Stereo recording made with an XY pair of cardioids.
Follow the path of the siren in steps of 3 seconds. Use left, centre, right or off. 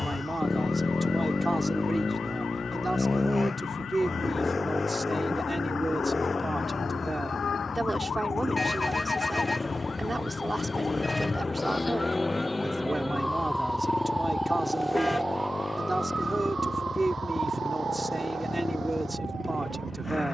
left, left, left, left, centre, right, right.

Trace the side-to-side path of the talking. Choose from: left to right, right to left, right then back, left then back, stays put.
stays put.